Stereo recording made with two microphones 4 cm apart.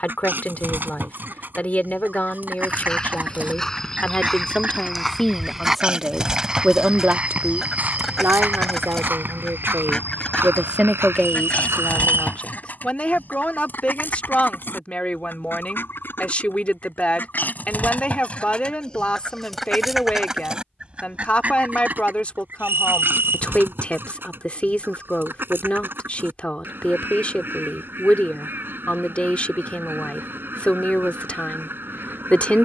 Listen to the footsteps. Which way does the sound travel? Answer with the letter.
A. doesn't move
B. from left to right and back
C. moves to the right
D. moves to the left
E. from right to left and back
C.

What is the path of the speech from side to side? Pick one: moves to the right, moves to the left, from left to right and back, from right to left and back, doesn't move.
from left to right and back.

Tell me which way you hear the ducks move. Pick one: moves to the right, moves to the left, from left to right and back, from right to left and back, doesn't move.
from right to left and back.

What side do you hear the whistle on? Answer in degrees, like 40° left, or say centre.
70° right.